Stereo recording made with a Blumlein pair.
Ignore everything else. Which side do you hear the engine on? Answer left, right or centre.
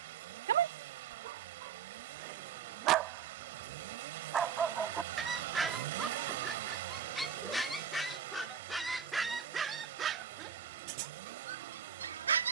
right.